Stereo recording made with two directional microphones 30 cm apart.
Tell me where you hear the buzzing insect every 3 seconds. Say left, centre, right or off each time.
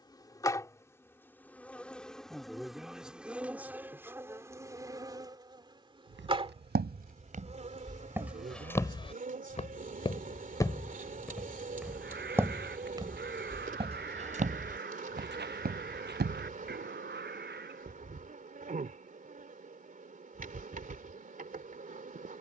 centre, centre, right, right, right, right, right, right.